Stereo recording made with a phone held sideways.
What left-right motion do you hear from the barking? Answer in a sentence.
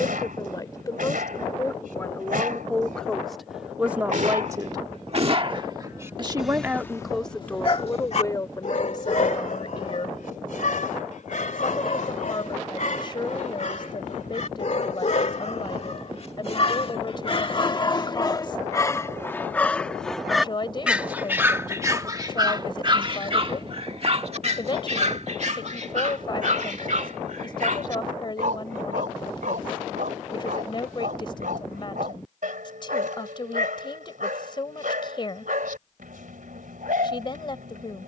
You can hear the barking move from right to left and back again.